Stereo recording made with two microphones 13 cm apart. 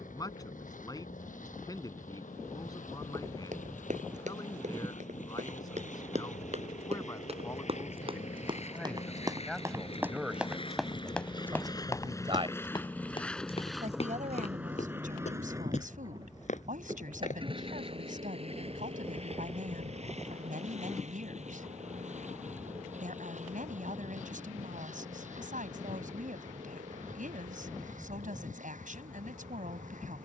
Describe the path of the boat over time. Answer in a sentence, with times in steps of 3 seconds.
You can hear the boat on the left from 0 s, in the centre from 12 s and on the right from 15 s.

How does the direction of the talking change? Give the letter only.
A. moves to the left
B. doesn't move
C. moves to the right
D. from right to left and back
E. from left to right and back
C.